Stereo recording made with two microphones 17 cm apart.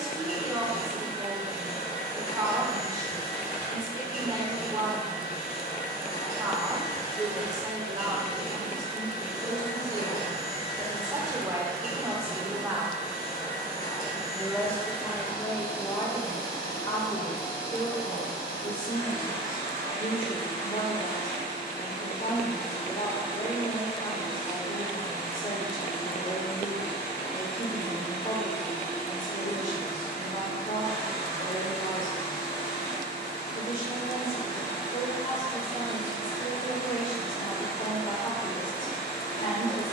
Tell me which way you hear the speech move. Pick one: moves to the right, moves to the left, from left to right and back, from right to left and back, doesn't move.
moves to the left.